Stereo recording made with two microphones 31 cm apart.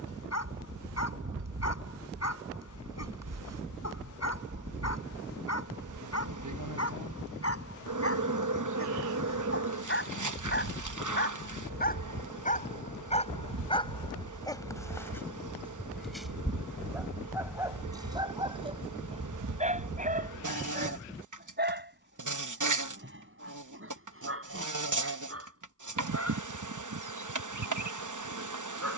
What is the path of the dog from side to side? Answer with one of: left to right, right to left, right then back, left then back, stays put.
left to right.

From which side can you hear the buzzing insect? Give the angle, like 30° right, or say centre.
70° right.